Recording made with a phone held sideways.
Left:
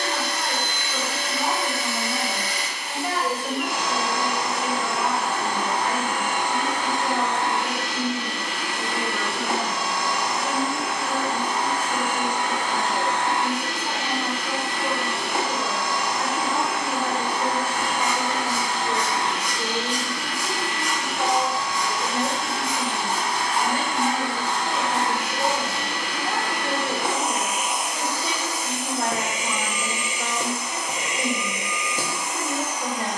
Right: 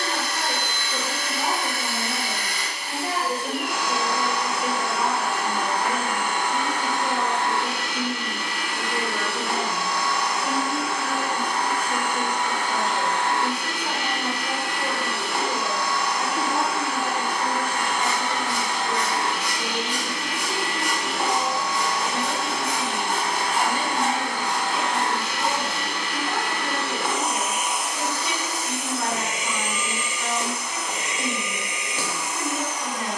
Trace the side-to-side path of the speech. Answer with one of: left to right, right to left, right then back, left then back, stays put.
right to left.